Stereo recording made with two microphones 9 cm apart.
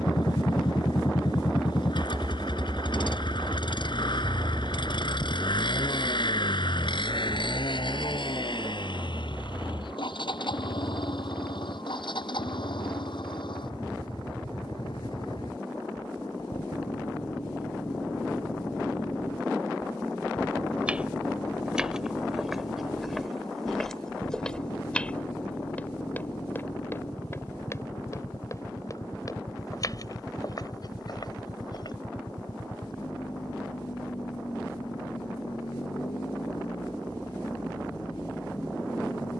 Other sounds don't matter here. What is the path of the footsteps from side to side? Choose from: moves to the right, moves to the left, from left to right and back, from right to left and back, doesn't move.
moves to the left.